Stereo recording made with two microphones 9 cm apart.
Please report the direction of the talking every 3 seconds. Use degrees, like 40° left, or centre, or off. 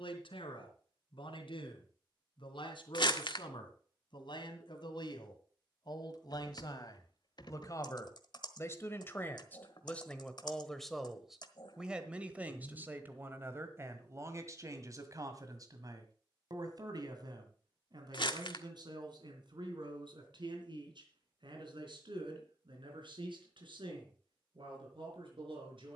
70° left, 60° left, 40° left, 10° left, 30° right, 50° right, 60° right, 60° right, 70° right.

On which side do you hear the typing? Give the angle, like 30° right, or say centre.
50° left.